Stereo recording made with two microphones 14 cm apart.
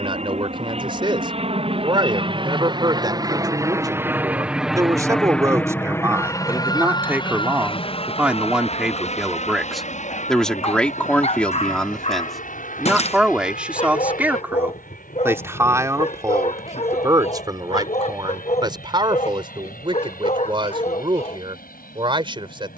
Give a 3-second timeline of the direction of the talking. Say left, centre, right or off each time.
right, right, centre, centre, centre, right, right, right.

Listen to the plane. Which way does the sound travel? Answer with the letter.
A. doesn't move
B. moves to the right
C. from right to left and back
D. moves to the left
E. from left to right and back
D.